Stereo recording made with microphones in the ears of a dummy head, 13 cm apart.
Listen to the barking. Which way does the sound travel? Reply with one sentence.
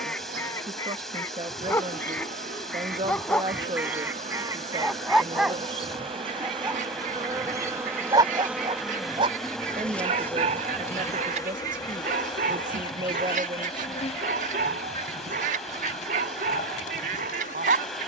You can hear the barking move to the right.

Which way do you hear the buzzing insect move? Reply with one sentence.
You can hear the buzzing insect go from the right side to the left.